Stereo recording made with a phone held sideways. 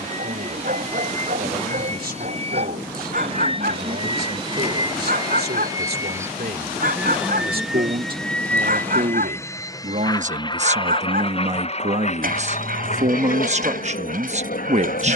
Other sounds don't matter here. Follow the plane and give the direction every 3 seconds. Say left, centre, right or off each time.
right, right, centre, left, left.